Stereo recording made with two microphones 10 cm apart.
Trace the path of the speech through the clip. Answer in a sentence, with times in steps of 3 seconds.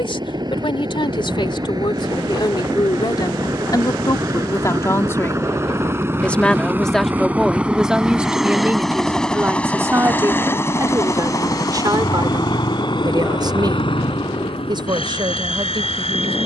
In this clip you hear the speech on the left from 0 s, in the centre from 6 s and on the right from 9 s.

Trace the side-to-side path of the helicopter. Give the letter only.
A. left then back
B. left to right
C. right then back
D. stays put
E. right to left
E.